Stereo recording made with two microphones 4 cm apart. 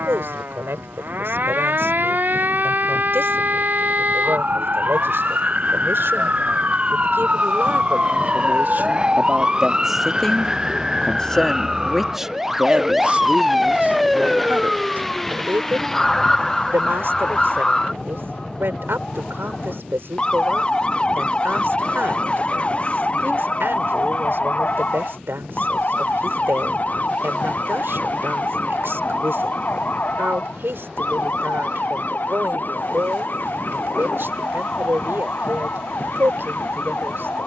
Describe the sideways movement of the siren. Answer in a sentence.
In this clip you hear the siren go from the right side to the left.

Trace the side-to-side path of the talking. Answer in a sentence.
In this clip you hear the talking move from right to left and back again.